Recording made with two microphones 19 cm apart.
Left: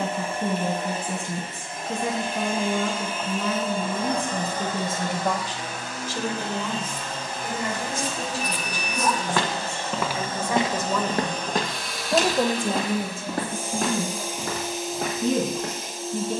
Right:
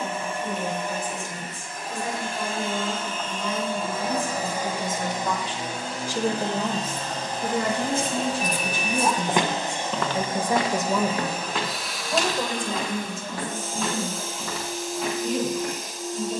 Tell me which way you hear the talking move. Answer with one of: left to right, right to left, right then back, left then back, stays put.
right then back.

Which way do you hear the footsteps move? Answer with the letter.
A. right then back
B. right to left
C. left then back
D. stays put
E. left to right
B.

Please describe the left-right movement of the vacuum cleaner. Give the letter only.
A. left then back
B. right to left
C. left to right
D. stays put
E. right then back
E.